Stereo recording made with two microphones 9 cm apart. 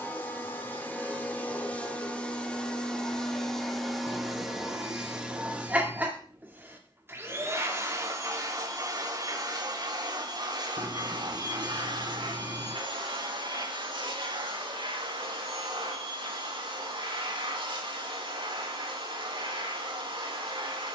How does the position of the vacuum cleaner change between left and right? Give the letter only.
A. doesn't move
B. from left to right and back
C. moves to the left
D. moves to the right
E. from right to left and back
D.